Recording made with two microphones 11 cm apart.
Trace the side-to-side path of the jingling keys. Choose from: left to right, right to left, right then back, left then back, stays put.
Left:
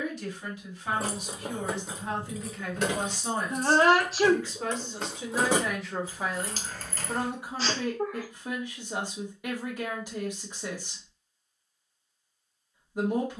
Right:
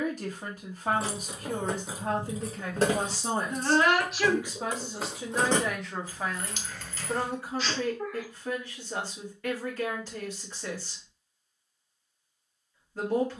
right then back.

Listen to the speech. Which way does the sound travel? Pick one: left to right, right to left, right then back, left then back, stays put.
right to left.